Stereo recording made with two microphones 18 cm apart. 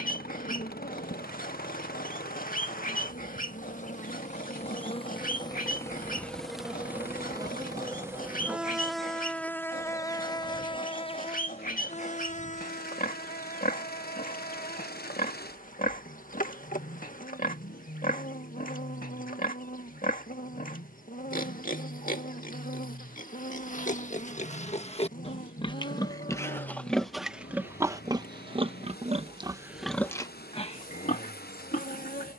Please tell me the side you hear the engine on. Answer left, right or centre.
left.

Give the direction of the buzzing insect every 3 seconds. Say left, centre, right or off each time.
left, left, centre, left, left, left, left, left, left, off, left.